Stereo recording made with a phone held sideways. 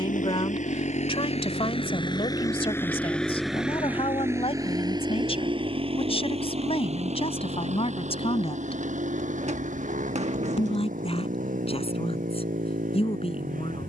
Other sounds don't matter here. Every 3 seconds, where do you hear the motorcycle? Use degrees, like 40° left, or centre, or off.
40° left, 20° right, 50° right, 60° right, 60° right.